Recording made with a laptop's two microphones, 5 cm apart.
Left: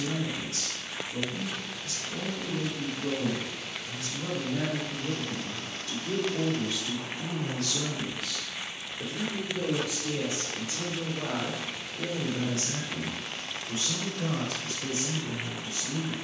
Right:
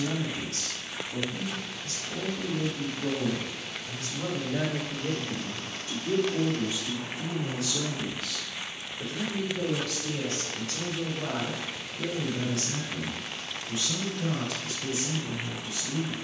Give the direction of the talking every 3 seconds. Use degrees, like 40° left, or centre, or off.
40° right, 30° right, 10° right, 20° left, 40° left, 40° left.